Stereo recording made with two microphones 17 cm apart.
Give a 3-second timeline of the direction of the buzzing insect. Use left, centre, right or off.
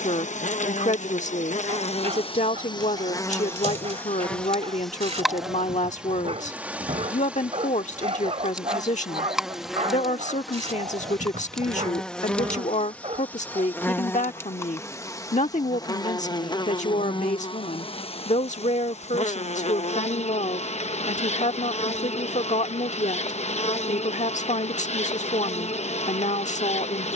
left, centre, centre, centre, centre, left, left, left, left.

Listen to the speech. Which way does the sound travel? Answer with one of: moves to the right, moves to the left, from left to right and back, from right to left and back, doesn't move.
doesn't move.